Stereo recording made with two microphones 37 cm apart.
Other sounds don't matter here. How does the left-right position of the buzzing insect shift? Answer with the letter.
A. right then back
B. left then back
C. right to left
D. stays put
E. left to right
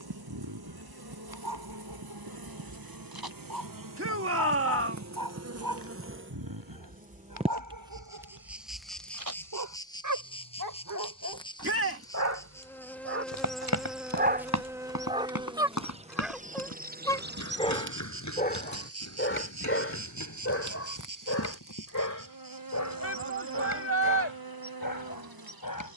B.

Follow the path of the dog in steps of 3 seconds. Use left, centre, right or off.
right, right, right, right, right, centre, left, left, left.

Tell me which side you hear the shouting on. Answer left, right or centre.
right.